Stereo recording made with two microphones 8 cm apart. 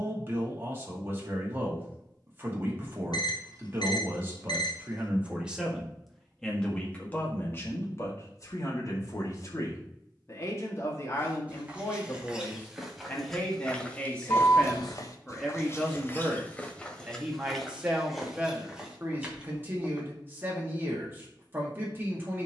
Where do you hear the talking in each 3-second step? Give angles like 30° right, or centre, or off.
30° right, 20° right, 30° left, 40° left, 20° left, 10° right, 20° right, 30° right.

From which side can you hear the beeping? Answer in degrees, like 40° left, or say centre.
70° left.